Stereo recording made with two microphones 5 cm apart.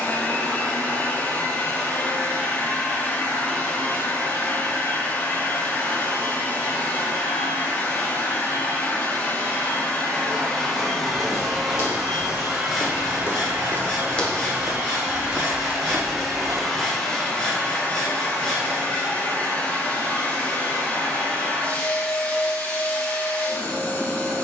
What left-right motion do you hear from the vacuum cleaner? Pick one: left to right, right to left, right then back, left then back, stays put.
right then back.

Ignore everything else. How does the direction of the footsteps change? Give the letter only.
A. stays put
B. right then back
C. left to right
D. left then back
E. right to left
C.